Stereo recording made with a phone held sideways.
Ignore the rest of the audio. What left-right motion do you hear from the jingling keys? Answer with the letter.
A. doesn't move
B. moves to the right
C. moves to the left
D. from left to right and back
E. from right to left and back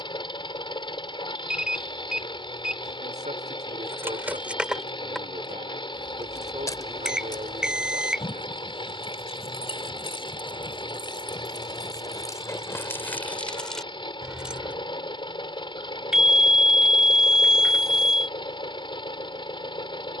E.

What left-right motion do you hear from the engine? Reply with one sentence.
In this clip you hear the engine stay put.